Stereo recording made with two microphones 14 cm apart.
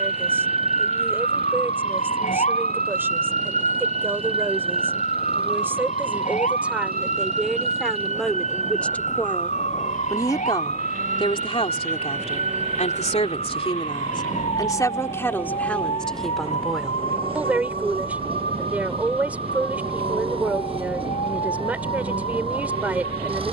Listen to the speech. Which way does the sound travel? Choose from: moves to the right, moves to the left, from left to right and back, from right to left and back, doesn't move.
from right to left and back.